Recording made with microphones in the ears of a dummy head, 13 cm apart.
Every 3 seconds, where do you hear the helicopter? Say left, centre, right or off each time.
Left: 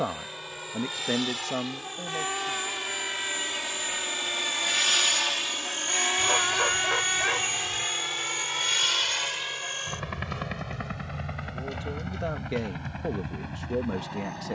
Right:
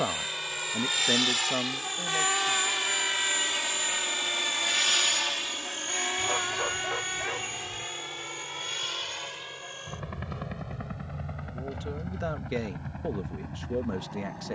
right, centre, left, left, left.